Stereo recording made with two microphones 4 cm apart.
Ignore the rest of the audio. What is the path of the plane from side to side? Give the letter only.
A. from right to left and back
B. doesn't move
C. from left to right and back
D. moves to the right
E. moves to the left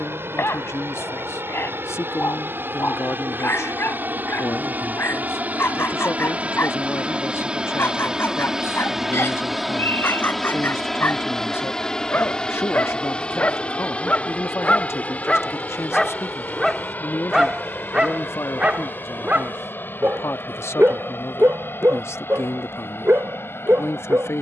E.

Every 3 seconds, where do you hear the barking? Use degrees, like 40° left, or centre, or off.
60° left, 60° left, 60° left, 60° left, 40° left, 10° left, 30° right, 60° right.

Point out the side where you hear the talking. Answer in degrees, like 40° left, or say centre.
70° left.